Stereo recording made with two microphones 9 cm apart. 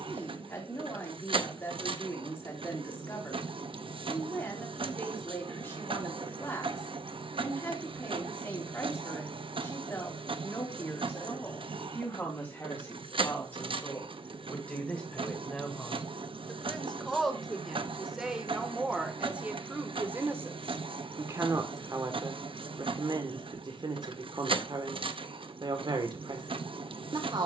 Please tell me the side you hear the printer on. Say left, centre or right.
right.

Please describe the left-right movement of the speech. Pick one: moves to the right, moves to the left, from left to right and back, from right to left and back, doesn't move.
moves to the right.